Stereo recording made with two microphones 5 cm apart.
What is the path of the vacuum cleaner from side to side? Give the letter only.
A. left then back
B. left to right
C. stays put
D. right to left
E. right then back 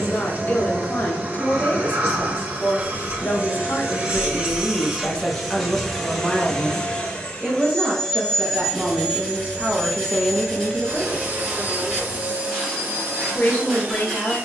A.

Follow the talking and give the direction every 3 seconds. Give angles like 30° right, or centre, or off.
40° left, 30° left, 20° right, centre, 40° left.